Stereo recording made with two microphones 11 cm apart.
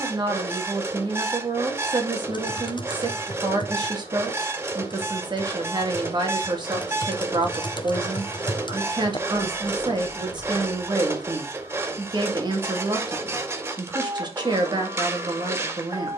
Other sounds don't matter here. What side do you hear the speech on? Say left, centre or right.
right.